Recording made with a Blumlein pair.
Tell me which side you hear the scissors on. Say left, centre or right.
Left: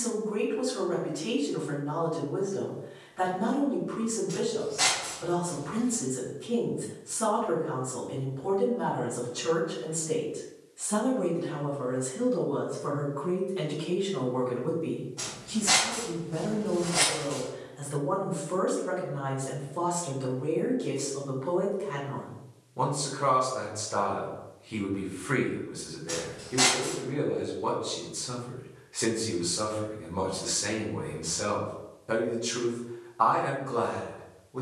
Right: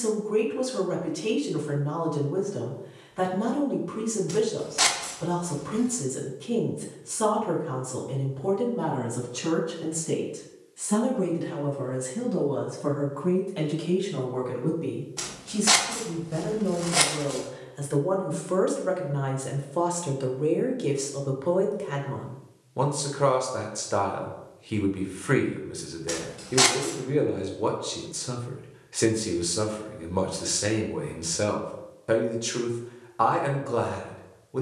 right.